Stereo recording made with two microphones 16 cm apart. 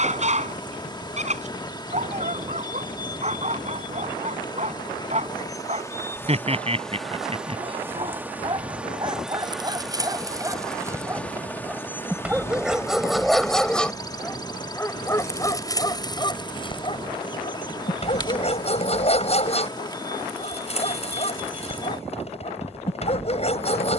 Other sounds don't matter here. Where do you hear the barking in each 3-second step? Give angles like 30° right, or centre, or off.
40° right, 40° right, 30° right, 20° right, centre, 30° left, 40° left, 40° left.